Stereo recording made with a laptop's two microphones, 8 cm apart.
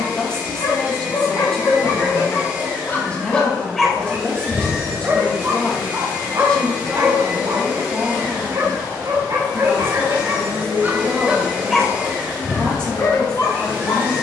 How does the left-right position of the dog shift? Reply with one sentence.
You can hear the dog go right and come back.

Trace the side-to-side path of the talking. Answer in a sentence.
In this clip you hear the talking stay put.